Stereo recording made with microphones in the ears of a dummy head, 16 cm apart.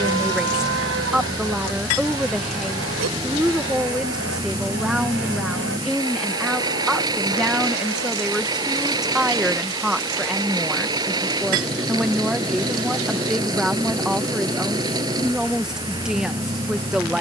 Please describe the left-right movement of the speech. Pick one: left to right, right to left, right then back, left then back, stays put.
stays put.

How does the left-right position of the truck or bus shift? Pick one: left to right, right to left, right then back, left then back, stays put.
stays put.